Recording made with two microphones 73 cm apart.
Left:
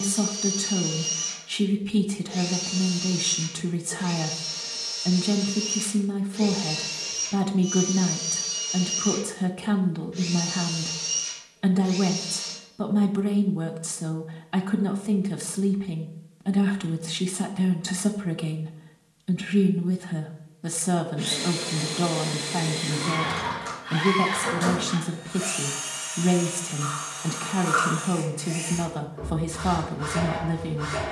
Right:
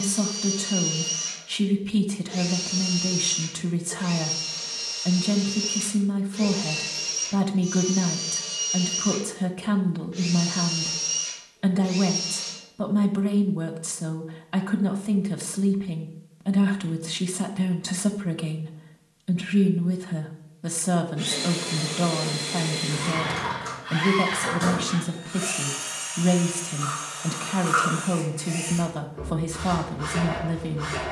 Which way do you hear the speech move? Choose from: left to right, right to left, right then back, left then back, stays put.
stays put.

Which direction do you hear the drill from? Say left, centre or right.
right.